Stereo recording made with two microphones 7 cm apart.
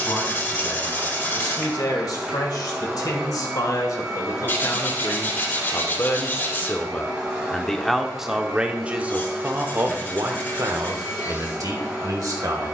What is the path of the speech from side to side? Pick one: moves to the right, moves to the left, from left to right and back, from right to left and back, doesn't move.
moves to the right.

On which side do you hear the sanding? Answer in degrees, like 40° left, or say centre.
30° left.